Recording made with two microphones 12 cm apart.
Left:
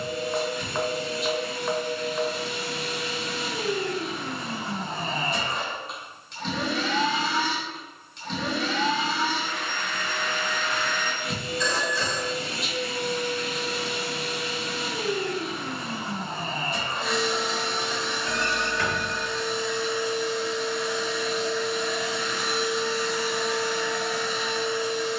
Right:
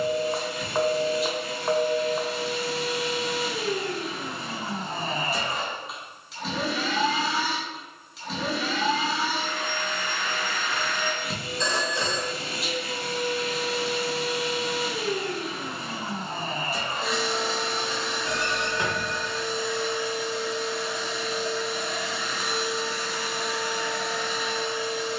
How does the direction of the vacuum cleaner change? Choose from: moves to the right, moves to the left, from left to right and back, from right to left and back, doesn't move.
doesn't move.